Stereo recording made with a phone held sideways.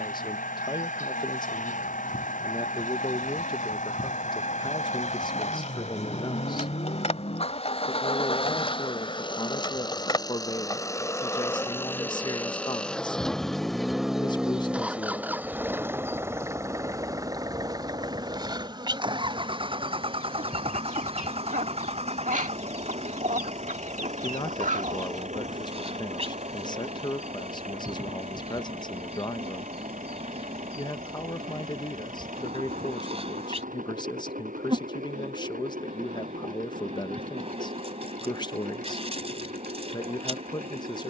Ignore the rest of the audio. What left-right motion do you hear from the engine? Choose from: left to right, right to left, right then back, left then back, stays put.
left to right.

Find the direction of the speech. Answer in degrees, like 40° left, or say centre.
30° left.